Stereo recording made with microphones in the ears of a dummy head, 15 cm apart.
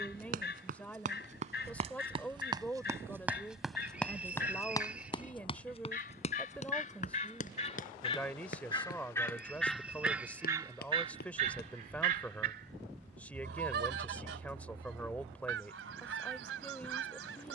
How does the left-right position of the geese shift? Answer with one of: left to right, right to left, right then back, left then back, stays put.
left to right.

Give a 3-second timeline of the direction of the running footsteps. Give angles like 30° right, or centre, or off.
40° right, 20° left, 50° left, 60° left, off, off.